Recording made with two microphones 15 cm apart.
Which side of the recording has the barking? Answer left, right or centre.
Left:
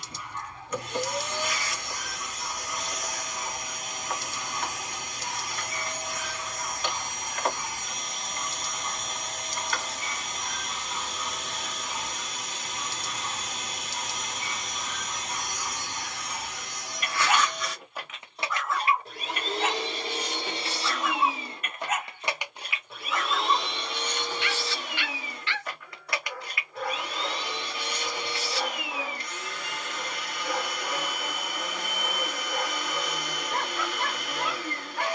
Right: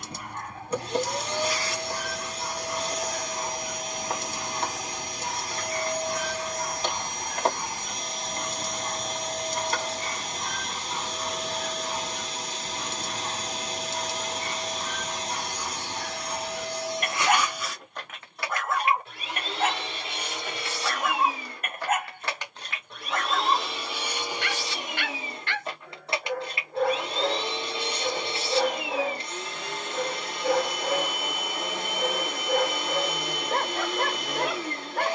right.